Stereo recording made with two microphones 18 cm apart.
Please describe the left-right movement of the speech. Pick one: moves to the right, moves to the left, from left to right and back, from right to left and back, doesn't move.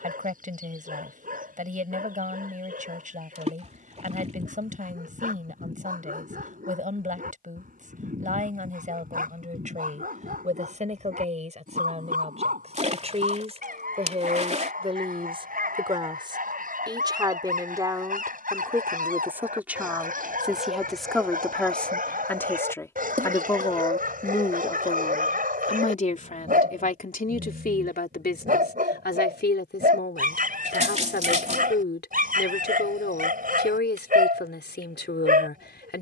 moves to the left.